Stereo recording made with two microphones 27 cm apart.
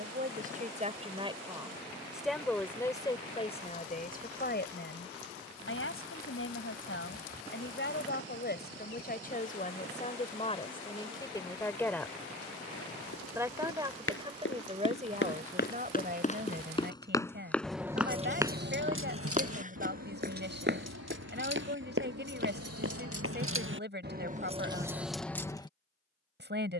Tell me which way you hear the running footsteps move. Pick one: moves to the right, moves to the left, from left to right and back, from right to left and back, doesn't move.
moves to the right.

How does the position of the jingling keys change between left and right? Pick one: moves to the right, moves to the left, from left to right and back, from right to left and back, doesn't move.
from left to right and back.